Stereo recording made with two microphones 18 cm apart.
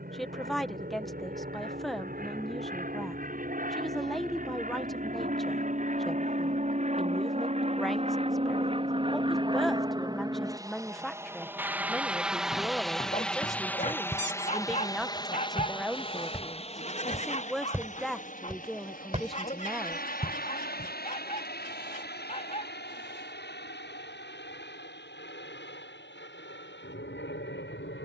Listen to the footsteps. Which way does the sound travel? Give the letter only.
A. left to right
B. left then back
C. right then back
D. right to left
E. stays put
A.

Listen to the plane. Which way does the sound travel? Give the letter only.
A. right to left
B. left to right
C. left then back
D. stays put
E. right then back
A.